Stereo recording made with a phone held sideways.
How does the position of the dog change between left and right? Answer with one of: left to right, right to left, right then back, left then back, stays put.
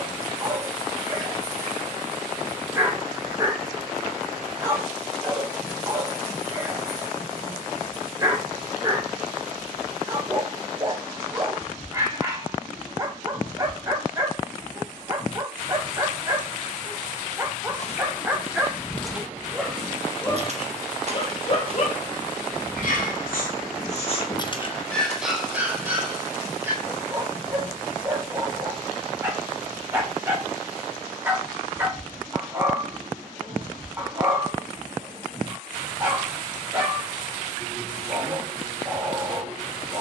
left then back.